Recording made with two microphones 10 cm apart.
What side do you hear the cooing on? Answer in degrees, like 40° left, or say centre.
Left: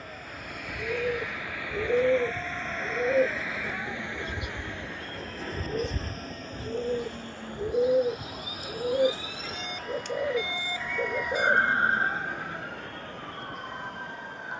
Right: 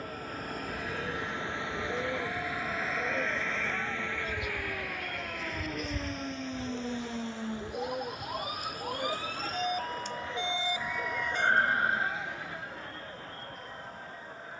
70° left.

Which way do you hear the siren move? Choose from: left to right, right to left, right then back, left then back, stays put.
right to left.